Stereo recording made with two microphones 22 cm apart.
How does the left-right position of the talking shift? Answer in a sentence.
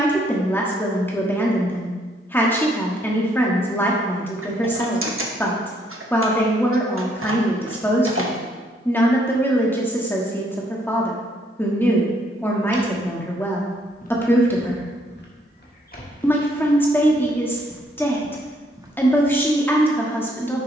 In this clip you hear the talking stay put.